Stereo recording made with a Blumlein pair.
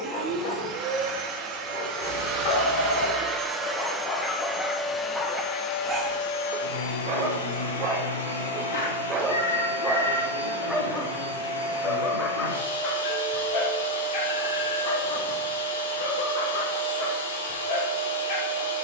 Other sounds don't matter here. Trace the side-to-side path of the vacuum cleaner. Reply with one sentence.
In this clip you hear the vacuum cleaner move from right to left.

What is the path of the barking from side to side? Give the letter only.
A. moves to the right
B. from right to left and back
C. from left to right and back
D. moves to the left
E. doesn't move
C.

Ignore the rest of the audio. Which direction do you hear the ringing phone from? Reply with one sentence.
In this clip you hear the ringing phone on the left.